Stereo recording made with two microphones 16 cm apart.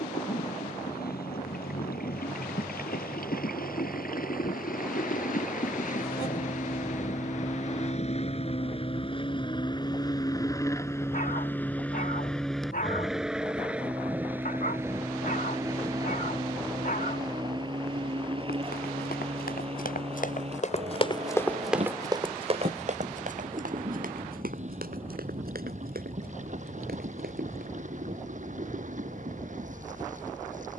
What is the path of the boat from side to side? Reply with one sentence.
In this clip you hear the boat go from the left side to the right.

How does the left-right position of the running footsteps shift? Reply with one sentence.
In this clip you hear the running footsteps travel towards the right.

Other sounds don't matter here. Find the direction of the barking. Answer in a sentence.
In this clip you hear the barking on the left.